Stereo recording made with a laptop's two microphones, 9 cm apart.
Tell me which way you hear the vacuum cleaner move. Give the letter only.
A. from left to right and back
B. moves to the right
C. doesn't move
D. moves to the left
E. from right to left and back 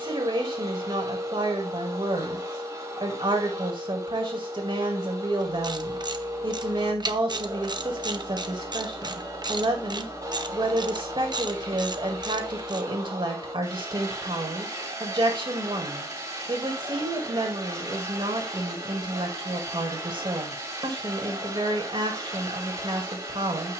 C.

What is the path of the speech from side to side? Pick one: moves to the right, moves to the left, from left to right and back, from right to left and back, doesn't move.
doesn't move.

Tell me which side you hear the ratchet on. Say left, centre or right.
right.